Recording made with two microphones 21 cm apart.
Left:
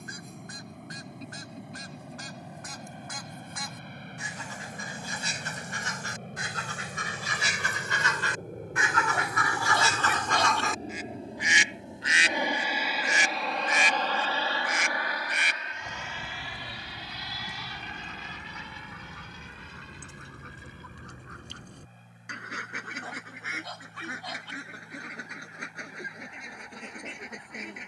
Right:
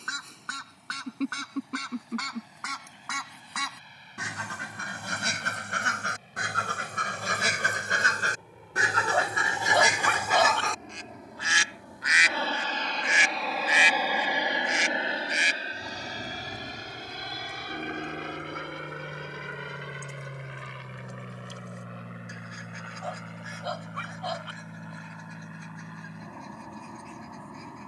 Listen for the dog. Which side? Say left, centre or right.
right.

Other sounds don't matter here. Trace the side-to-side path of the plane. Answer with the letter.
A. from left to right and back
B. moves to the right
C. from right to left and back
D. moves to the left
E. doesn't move
B.